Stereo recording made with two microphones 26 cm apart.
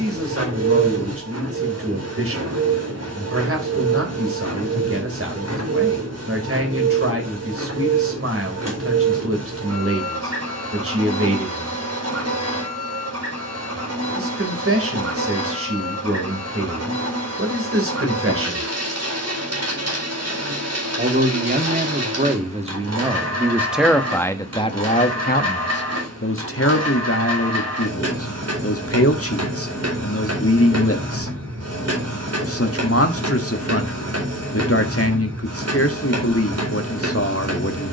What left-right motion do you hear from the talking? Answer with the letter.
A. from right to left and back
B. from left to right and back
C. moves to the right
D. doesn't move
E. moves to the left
E.